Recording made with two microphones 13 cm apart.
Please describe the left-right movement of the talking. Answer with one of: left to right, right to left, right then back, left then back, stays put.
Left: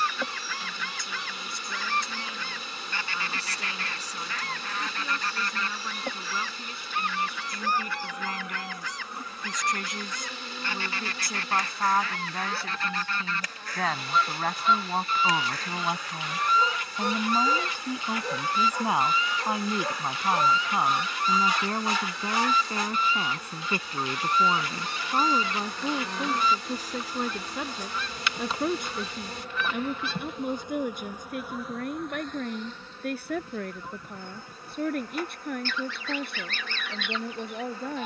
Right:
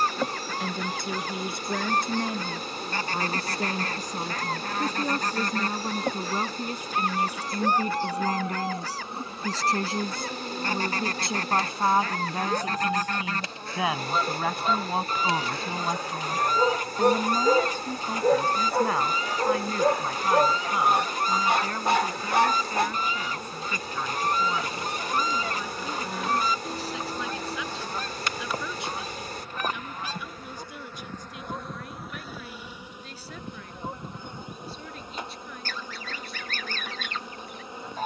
right to left.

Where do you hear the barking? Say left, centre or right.
right.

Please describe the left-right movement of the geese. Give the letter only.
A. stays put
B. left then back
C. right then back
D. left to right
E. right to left
A.